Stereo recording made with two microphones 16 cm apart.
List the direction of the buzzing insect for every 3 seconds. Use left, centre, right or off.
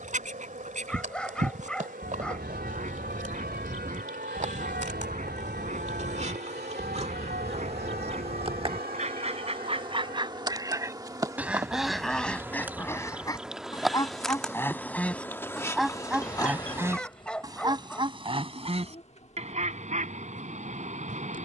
right, right, right, right, centre, left, left.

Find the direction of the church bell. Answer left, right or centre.
right.